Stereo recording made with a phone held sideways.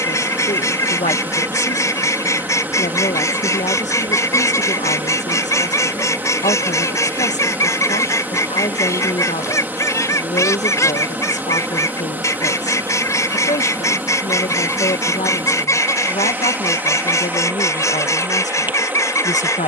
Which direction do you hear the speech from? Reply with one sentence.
In this clip you hear the speech on the left.